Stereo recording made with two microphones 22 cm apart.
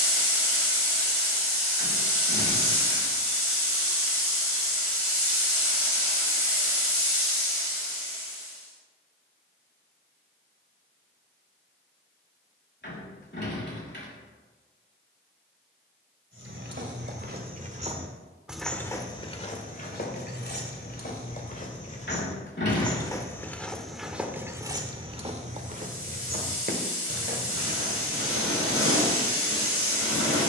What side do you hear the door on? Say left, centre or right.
left.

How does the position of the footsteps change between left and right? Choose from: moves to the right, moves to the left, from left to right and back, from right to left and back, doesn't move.
from right to left and back.